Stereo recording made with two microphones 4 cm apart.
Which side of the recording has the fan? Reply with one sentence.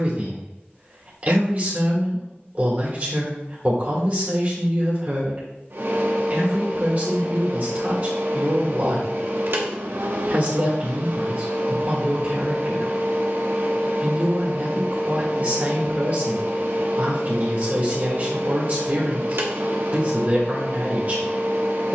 In this clip you hear the fan on the right.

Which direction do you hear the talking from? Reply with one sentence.
In this clip you hear the talking on the right.